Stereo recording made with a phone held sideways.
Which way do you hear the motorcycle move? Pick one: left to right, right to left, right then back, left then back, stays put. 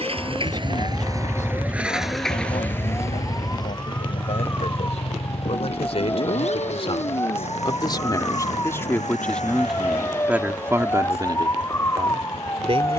right to left.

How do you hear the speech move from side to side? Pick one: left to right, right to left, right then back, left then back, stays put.
left to right.